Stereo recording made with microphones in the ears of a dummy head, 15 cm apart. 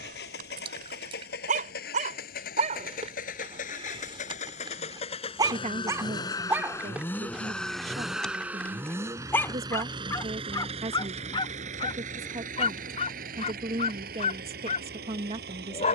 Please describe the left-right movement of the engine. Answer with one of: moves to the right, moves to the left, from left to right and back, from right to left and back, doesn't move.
moves to the right.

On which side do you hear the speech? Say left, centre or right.
right.